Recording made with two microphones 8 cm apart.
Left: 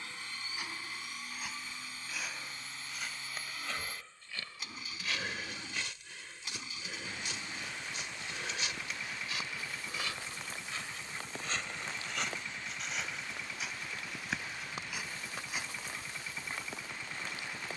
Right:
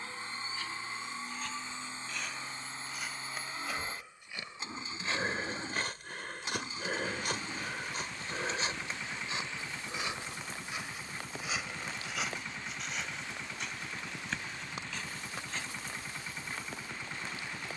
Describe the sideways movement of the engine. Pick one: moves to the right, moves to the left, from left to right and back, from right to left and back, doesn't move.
doesn't move.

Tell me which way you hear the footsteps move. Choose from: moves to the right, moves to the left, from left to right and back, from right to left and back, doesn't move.
from left to right and back.